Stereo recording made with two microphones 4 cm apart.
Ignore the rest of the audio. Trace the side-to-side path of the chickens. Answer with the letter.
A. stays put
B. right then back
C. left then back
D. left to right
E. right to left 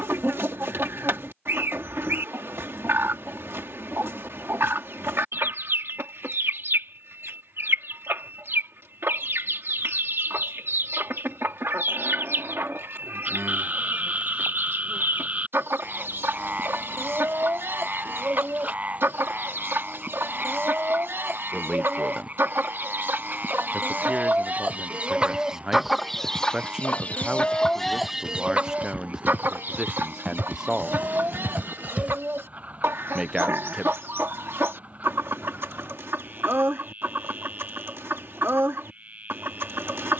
C.